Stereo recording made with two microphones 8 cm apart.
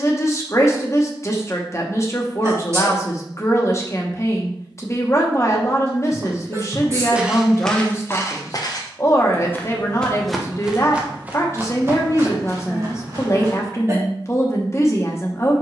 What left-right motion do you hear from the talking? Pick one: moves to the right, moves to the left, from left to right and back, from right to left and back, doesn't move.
doesn't move.